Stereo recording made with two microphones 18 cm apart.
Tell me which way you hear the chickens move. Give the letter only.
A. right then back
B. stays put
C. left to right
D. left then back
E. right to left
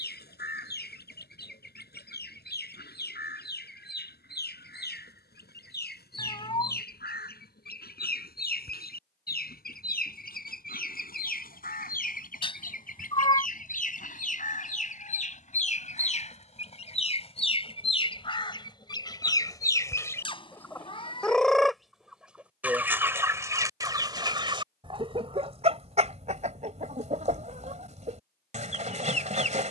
C.